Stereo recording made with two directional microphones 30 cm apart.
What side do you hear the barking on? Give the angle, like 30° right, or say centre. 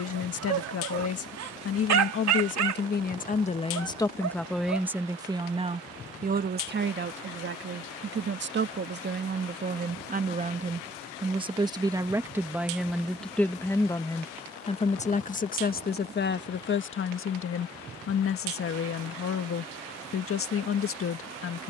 60° right.